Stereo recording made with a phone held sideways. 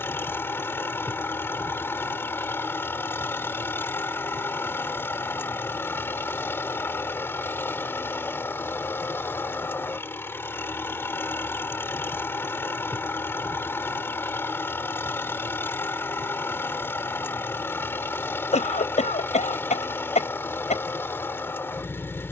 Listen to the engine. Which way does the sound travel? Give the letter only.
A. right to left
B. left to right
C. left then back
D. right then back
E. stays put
E.